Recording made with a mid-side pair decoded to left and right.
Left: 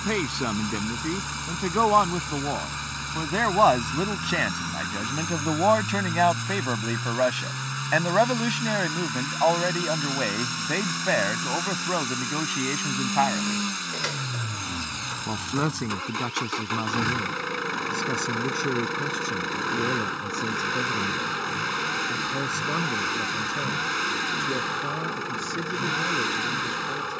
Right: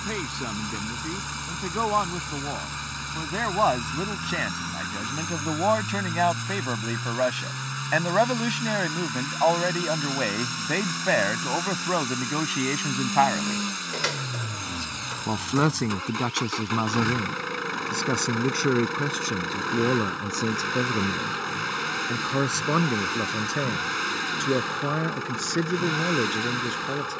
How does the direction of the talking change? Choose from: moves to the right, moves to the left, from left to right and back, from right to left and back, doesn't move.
moves to the right.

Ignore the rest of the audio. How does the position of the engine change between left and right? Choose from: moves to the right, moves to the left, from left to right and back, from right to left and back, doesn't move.
doesn't move.